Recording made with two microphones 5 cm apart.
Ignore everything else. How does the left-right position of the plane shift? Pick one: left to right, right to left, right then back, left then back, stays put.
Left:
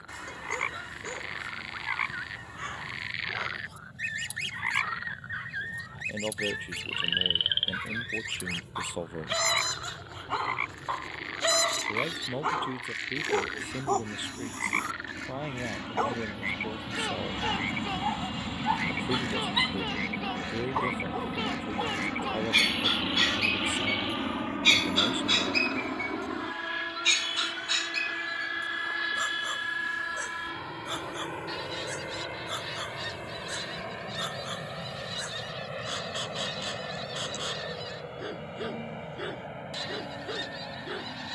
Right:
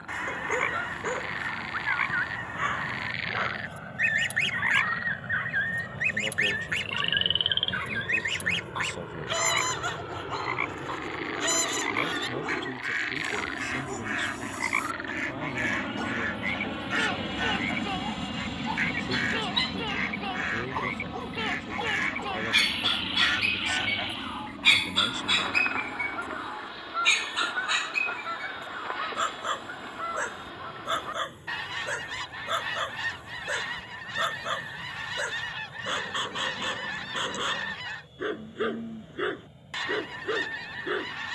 right to left.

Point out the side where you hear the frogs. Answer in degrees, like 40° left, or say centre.
10° right.